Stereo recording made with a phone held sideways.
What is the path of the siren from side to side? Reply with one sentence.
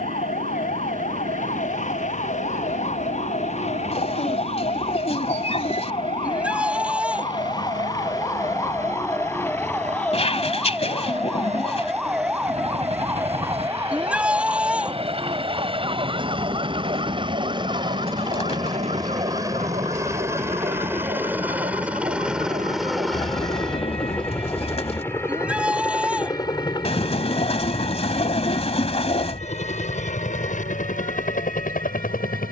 In this clip you hear the siren move from left to right.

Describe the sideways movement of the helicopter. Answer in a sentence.
You can hear the helicopter travel towards the left.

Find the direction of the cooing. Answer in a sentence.
In this clip you hear the cooing on the left.